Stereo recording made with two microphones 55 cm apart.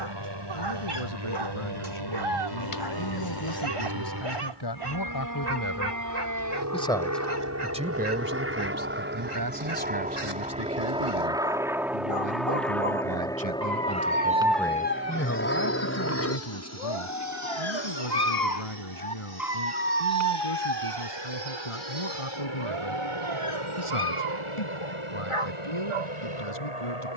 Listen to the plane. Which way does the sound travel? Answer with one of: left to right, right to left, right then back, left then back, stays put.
right to left.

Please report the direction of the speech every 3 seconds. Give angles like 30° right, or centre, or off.
70° left, 50° left, 10° right, 40° right, 30° right, 50° left, 70° left, 70° left, 70° left.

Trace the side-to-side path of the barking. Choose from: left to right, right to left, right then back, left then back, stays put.
left then back.